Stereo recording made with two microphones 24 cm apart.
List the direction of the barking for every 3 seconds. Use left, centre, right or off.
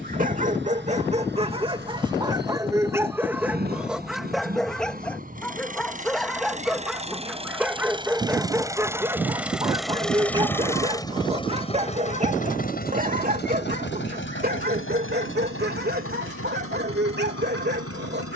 right, centre, centre, right, right, right.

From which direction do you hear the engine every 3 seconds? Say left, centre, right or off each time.
right, right, right, centre, left, left.